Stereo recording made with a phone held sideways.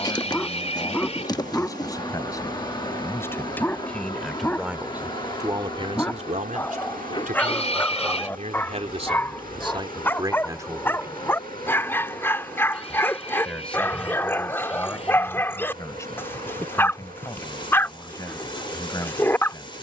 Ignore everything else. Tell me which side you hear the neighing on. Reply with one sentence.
In this clip you hear the neighing on the left.